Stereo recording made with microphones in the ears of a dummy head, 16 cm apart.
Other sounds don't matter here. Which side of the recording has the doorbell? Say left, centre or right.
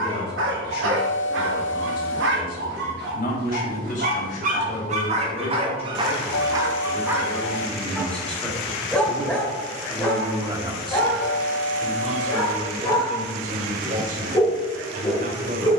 left.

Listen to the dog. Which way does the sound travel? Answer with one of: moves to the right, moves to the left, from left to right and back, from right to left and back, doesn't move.
moves to the left.